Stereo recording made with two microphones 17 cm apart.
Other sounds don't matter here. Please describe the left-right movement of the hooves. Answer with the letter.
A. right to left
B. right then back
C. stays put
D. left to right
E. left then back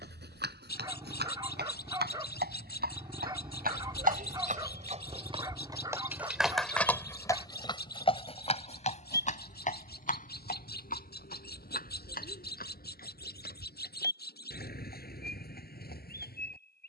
A.